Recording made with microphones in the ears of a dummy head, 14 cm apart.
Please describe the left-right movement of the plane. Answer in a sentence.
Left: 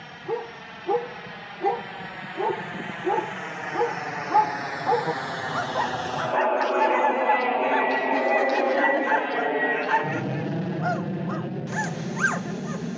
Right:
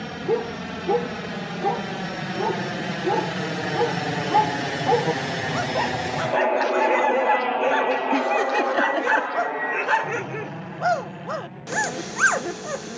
You can hear the plane go from the right side to the left.